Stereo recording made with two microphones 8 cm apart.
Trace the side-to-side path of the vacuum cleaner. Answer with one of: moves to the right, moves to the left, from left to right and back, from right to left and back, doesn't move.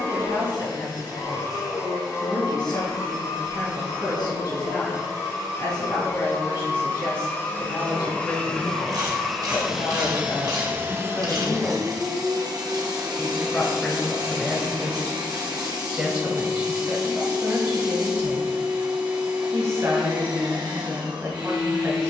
moves to the right.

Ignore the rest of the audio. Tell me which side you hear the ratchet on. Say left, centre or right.
right.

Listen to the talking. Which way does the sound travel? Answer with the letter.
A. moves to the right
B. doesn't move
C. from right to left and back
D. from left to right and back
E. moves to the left
A.